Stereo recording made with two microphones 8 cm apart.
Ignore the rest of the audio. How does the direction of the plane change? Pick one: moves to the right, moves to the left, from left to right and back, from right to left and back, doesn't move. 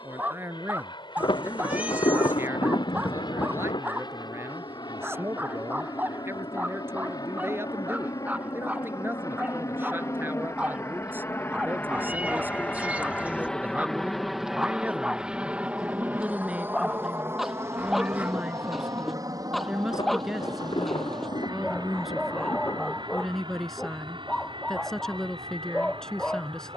moves to the right.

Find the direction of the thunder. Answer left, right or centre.
left.